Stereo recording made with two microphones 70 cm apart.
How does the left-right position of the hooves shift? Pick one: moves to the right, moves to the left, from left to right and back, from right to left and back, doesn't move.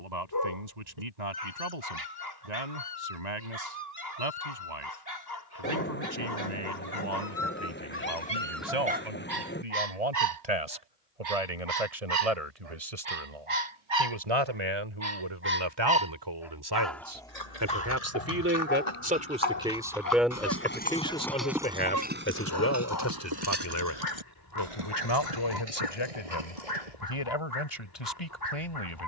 moves to the right.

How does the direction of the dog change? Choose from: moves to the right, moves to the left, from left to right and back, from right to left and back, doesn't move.
from left to right and back.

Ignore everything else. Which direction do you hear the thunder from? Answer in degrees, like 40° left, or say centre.
10° left.